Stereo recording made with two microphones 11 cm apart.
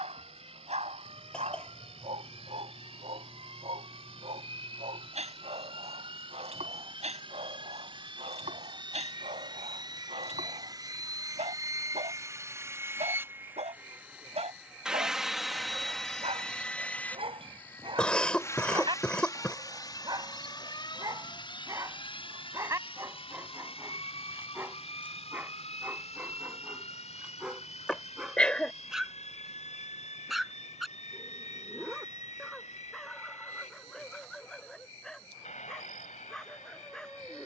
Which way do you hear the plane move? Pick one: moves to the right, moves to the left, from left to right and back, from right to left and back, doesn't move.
moves to the left.